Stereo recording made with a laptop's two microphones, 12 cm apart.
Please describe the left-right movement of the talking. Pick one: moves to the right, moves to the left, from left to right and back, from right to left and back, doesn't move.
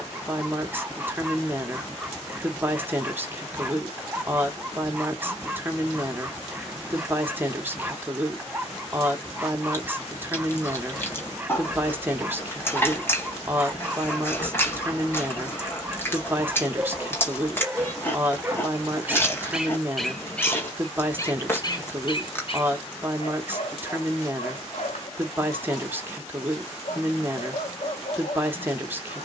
doesn't move.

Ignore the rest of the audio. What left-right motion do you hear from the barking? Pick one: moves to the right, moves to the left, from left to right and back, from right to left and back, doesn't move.
moves to the left.